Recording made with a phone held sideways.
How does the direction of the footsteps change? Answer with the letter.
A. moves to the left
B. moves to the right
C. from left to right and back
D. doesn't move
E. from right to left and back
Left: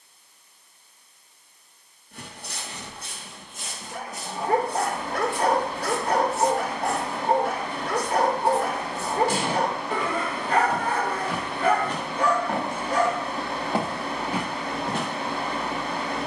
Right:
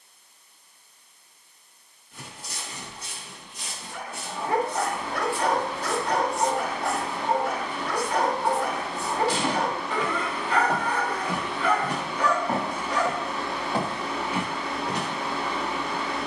C.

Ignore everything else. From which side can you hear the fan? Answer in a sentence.
You can hear the fan on the left.